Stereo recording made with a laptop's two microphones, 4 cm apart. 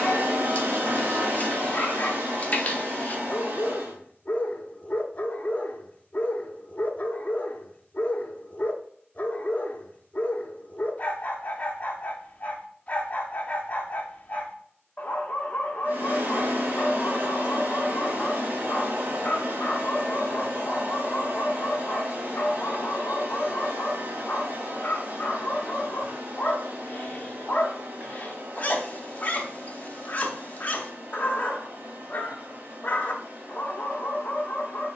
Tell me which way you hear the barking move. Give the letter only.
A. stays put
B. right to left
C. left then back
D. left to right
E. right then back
A.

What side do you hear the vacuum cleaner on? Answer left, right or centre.
right.